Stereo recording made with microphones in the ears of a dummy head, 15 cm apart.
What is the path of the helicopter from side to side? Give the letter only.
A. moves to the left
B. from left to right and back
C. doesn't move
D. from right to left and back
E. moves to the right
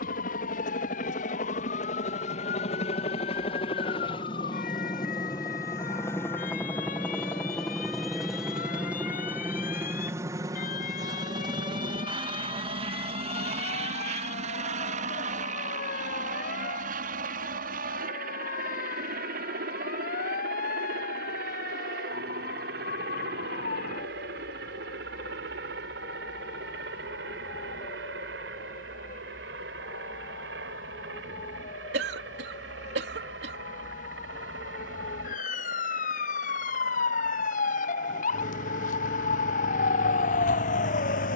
E.